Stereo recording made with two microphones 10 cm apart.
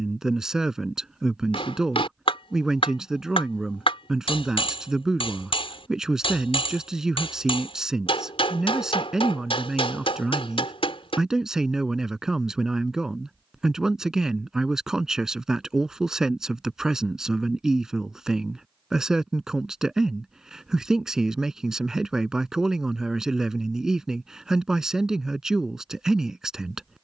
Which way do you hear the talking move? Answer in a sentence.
You can hear the talking stay in one place.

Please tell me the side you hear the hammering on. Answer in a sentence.
In this clip you hear the hammering on the left.